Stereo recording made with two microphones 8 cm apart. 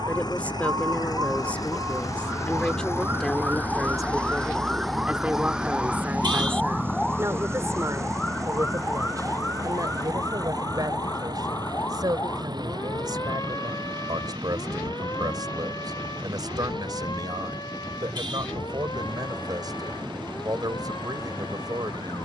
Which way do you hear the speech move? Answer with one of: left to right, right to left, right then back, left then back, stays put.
left to right.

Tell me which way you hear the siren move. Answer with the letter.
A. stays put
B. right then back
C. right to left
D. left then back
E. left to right
C.